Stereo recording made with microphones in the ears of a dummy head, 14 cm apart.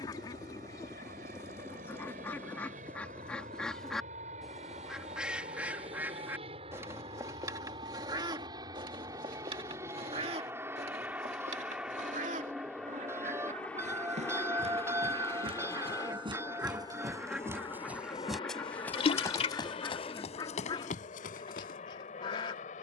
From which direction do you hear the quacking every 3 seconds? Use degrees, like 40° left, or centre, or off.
20° left, centre, 20° right, 40° right, 50° right, 20° right, 20° left, 30° left.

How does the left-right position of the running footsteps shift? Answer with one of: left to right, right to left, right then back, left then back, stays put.
right to left.